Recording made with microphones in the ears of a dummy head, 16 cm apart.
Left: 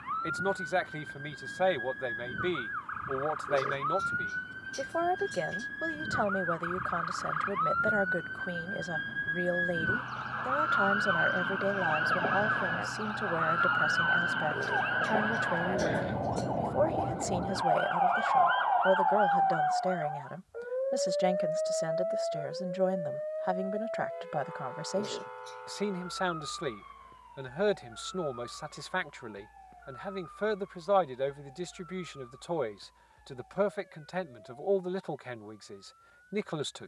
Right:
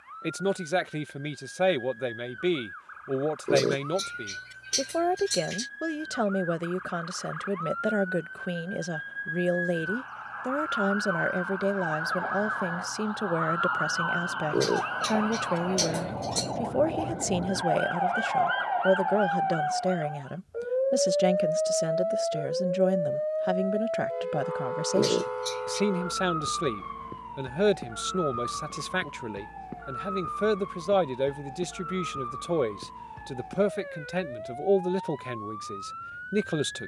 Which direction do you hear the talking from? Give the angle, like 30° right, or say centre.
30° right.